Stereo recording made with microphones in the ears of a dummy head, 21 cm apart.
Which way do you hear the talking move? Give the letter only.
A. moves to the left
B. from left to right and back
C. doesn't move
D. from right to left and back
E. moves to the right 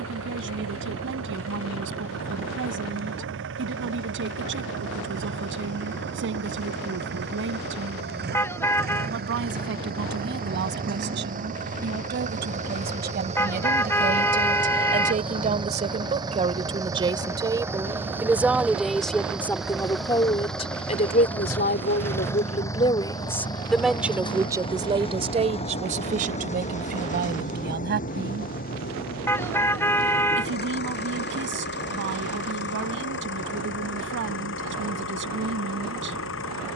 D.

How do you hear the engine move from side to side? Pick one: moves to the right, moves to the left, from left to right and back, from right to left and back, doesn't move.
moves to the left.